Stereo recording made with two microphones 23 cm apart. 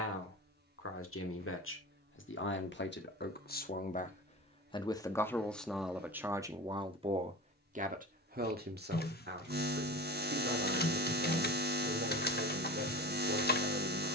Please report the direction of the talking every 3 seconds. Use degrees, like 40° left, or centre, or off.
60° left, 20° left, 30° right, 50° right, 60° right.